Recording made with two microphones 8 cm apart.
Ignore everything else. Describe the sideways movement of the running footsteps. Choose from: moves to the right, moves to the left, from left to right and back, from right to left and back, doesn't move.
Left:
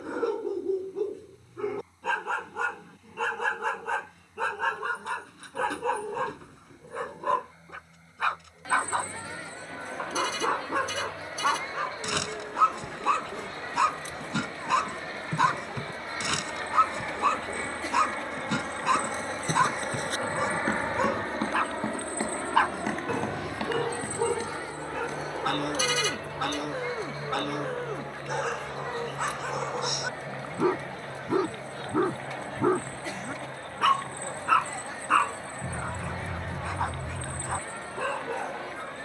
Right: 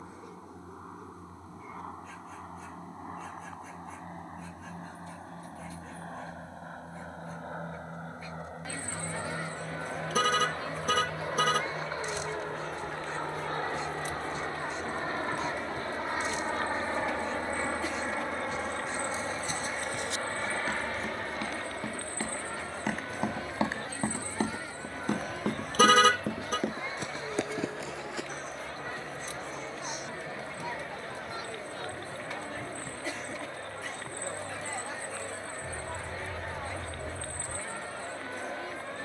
moves to the right.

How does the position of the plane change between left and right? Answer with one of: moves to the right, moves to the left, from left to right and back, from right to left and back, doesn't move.
moves to the left.